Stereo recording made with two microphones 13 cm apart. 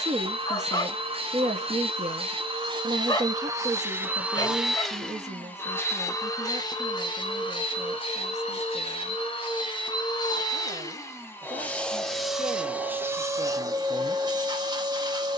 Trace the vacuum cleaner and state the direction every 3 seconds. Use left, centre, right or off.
right, centre, left, left, right.